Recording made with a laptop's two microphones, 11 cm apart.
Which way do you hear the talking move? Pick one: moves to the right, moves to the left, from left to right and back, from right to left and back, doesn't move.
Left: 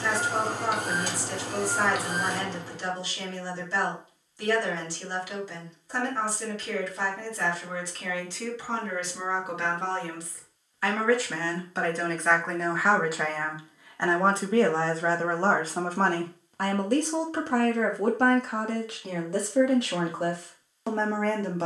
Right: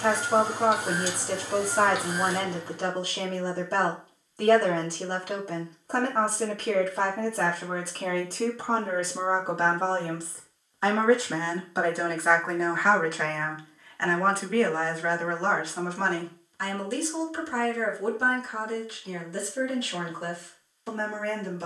moves to the left.